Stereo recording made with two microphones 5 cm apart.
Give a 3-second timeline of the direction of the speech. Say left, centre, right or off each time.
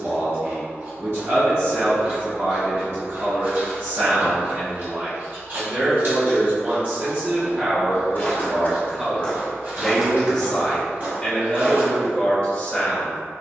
right, right, right, centre, left.